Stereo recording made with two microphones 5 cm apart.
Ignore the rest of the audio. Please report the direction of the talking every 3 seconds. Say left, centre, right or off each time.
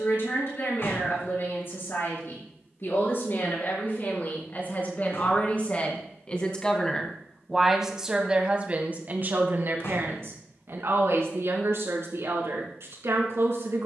left, left, centre, right, right.